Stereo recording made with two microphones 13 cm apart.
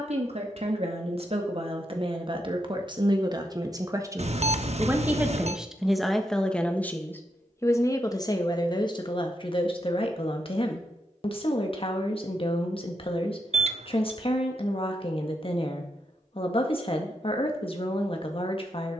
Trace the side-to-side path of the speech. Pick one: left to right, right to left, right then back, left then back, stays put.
right to left.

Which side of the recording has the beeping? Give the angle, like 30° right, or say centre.
60° right.